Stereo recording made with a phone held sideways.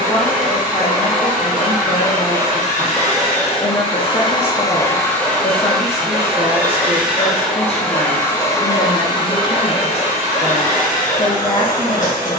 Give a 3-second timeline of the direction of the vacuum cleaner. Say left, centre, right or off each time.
left, left, centre, left.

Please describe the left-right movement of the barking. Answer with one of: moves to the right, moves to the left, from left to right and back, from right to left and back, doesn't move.
moves to the left.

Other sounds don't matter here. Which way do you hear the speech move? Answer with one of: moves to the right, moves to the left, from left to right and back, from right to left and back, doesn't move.
doesn't move.